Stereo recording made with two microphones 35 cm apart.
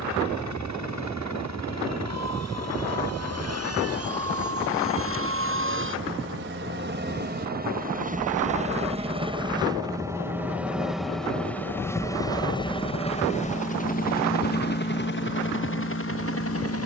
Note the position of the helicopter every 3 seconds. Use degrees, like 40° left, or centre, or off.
50° right, 40° right, 30° right, centre, 20° left, 40° left.